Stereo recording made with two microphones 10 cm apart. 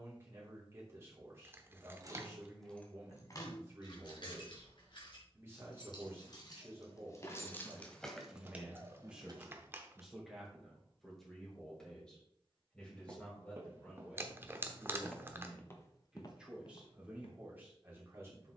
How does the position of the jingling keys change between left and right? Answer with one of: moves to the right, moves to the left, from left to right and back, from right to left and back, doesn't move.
from right to left and back.